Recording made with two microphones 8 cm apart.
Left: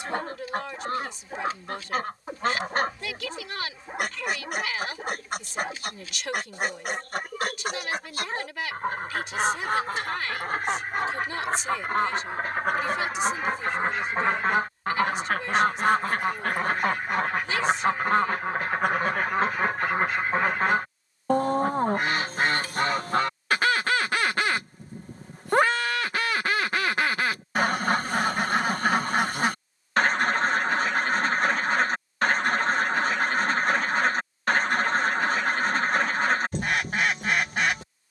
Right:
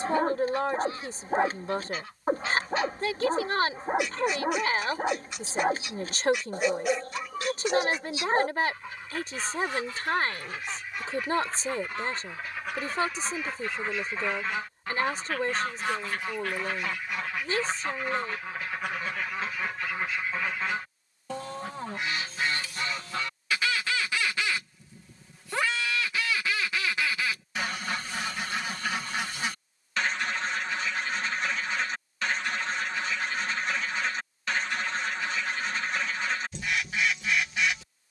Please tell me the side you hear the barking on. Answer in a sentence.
In this clip you hear the barking on the right.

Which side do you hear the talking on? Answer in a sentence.
You can hear the talking on the right.